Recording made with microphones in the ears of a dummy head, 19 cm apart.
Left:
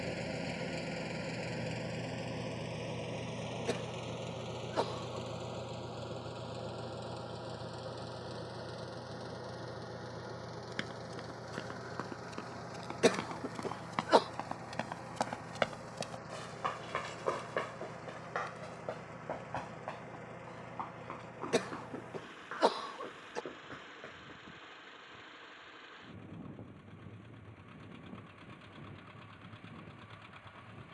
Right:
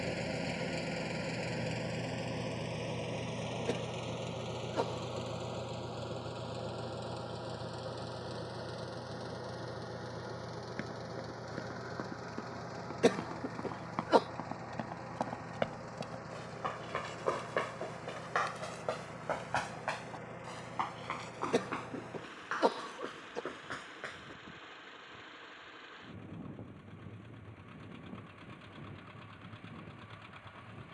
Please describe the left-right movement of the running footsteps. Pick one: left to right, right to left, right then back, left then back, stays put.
left to right.